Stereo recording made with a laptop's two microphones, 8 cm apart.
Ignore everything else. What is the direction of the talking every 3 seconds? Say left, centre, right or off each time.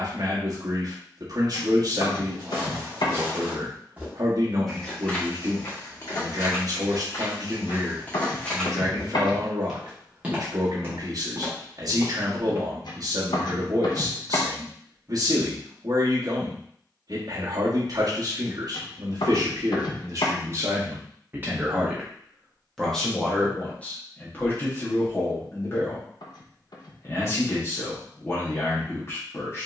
right, right, right, right, right, right, right, centre, left, left.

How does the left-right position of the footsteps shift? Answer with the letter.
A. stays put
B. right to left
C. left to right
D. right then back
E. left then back
E.